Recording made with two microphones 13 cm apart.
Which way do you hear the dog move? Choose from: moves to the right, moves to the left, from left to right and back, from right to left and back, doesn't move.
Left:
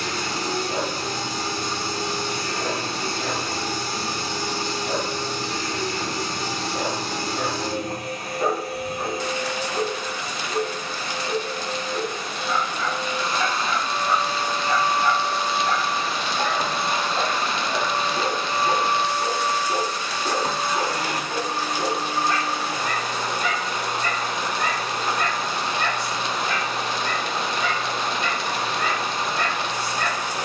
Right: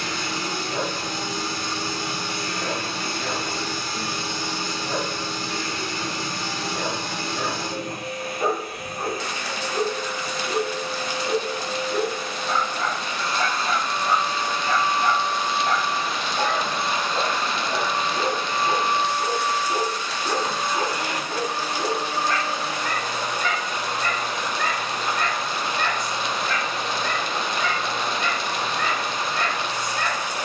from left to right and back.